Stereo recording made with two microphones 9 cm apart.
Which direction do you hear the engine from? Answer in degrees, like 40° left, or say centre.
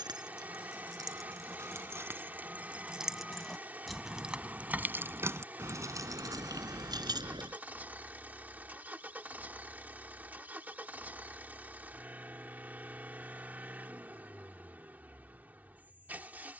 20° right.